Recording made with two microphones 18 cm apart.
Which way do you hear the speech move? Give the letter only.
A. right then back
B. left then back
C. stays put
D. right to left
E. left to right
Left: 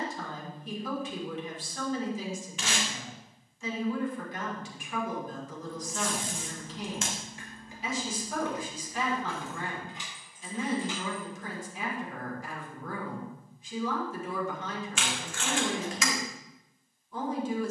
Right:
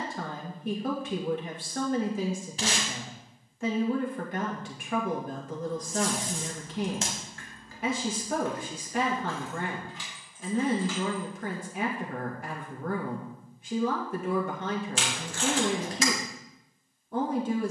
C.